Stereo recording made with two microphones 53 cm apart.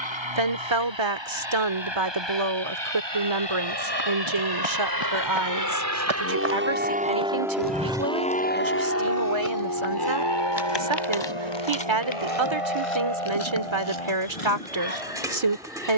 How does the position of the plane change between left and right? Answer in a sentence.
In this clip you hear the plane move to the left.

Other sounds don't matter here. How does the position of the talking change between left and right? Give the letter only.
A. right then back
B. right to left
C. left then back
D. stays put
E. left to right
D.